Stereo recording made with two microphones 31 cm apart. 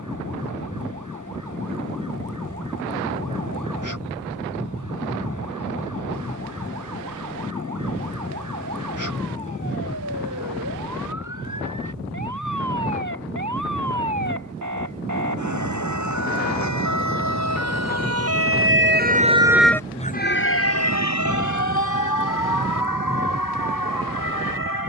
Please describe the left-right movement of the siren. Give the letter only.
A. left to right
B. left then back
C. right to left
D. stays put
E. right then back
C.